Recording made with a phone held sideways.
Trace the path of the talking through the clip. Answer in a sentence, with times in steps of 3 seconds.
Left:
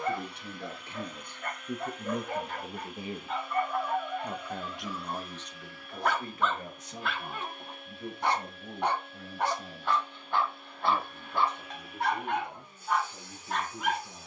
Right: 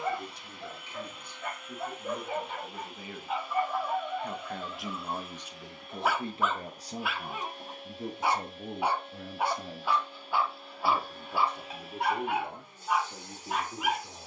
You can hear the talking on the left from 0 s, in the centre from 3 s and on the right from 6 s.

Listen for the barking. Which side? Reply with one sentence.
You can hear the barking in the centre.